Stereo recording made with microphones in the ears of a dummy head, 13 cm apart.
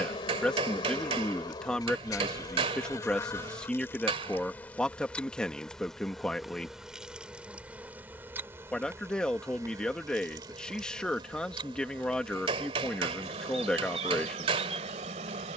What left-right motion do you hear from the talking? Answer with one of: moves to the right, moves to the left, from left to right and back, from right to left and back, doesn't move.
doesn't move.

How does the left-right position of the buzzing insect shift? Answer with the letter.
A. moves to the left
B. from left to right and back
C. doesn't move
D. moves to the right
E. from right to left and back
D.